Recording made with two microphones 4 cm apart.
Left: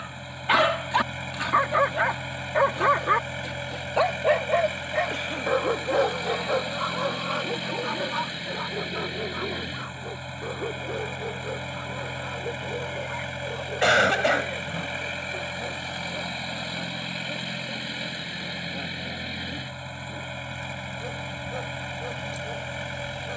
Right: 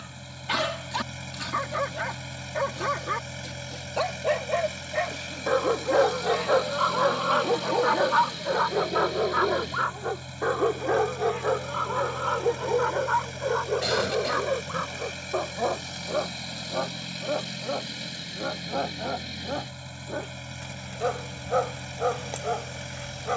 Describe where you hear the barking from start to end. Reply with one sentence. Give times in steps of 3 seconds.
You can hear the barking on the left from 0 s, in the centre from 3 s and on the right from 6 s.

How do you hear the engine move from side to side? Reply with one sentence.
You can hear the engine stay put.